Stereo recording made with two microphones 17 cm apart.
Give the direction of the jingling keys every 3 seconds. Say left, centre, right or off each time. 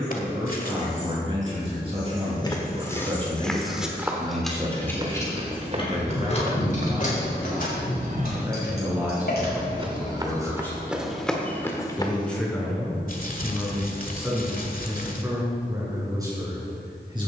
right, centre, left, left, off, off.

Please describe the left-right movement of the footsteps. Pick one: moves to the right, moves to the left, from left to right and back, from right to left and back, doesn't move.
from left to right and back.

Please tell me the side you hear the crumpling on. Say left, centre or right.
left.